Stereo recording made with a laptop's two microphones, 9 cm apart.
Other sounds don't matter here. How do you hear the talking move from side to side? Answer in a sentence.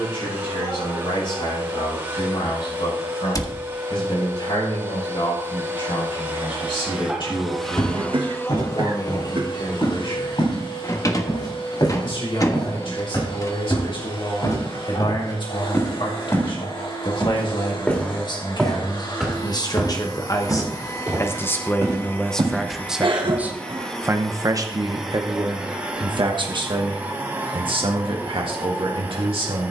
You can hear the talking travel towards the right.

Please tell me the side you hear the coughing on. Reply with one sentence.
You can hear the coughing on the right.